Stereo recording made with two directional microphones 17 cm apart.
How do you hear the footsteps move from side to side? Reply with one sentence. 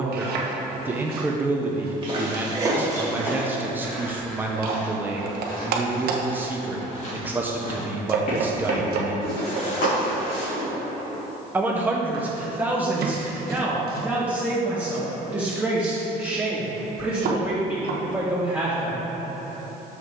You can hear the footsteps go from the right side to the left.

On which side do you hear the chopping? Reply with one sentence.
In this clip you hear the chopping on the right.